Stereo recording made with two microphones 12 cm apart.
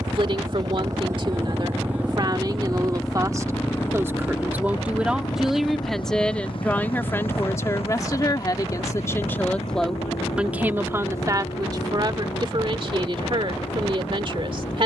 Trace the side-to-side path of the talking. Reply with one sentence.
You can hear the talking go left and come back.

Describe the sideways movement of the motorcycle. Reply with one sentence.
In this clip you hear the motorcycle move from right to left.